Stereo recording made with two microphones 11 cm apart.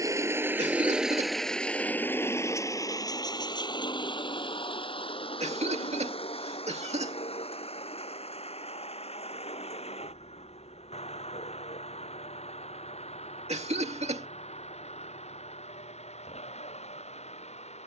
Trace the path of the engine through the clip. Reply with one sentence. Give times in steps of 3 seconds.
You can hear the engine in the centre from 0 s and on the left from 3 s.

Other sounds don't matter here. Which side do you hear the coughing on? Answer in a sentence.
In this clip you hear the coughing on the right.